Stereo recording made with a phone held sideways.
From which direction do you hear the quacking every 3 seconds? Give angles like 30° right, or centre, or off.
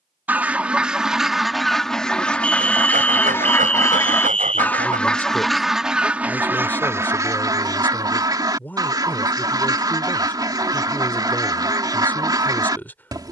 centre, 10° left, 20° right, 30° right, 30° right.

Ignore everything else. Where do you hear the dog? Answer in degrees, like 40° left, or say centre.
70° right.